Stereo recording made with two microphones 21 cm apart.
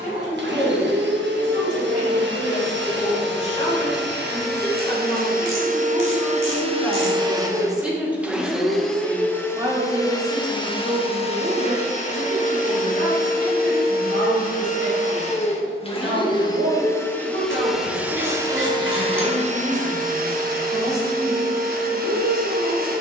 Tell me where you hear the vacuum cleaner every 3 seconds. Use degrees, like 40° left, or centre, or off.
60° right, 50° right, 20° right, 20° left, 40° left, 20° left, 30° right, 40° right.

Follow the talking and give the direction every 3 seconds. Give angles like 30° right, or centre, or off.
30° left, 20° left, centre, 30° right, 60° right, 70° right, 80° right, 80° right.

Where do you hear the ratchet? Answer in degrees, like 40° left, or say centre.
70° right.